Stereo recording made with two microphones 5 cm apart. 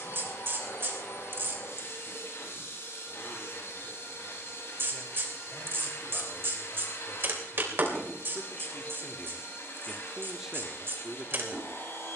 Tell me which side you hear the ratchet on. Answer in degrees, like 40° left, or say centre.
50° right.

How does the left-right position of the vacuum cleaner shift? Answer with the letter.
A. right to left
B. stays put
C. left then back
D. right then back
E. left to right
B.